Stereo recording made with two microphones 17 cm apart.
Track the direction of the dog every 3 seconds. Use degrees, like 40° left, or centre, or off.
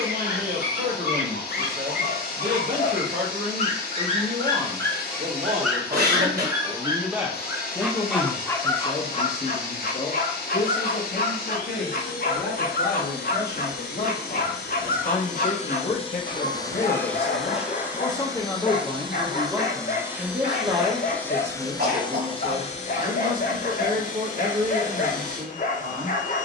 60° left, 20° left, centre, 50° left, 50° left, 50° left, 50° left, 50° left, 50° left.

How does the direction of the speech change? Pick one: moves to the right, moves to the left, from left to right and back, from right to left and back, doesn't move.
from right to left and back.